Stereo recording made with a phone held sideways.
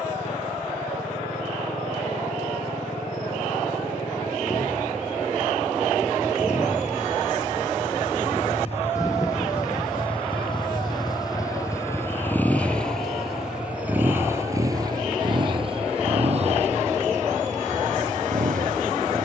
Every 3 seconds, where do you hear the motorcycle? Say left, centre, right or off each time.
left, left, left, left, centre, right, right.